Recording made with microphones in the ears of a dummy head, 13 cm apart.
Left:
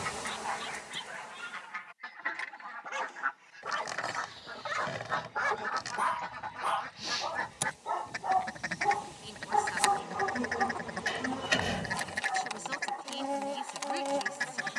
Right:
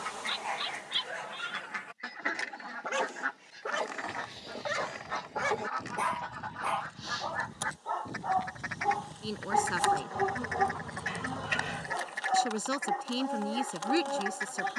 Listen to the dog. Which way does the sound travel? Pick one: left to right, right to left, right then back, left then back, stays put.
left then back.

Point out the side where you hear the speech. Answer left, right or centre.
right.